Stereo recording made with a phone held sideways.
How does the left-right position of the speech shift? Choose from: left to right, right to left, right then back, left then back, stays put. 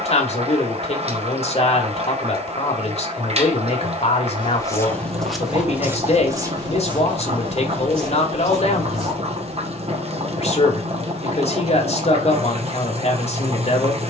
stays put.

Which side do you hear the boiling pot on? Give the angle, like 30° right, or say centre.
40° right.